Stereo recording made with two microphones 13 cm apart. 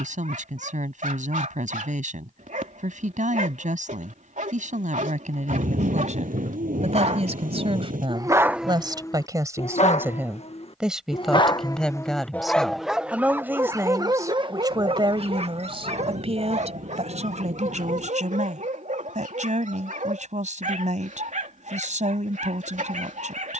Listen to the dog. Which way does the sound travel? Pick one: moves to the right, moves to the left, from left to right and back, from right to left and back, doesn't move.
from right to left and back.